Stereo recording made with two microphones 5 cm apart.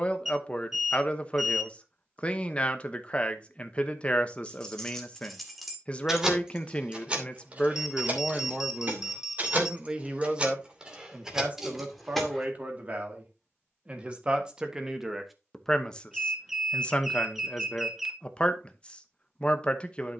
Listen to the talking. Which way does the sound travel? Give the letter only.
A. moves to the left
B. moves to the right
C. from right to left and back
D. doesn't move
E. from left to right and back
E.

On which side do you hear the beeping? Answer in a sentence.
In this clip you hear the beeping in the centre.